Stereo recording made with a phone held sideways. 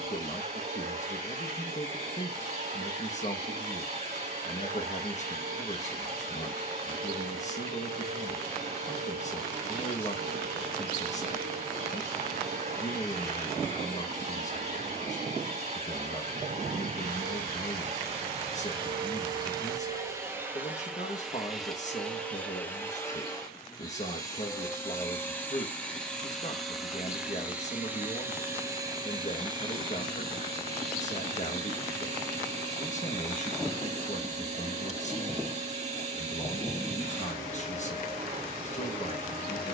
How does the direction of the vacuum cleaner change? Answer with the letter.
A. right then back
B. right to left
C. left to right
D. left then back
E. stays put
D.